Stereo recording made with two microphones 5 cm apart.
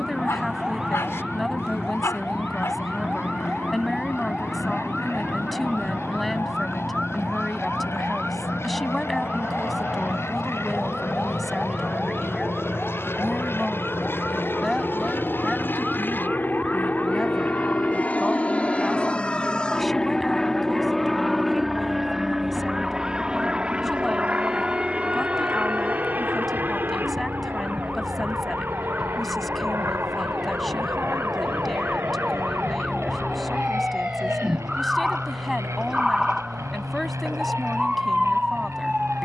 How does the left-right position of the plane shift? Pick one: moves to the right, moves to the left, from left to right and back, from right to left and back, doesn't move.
moves to the right.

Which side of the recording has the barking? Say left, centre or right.
left.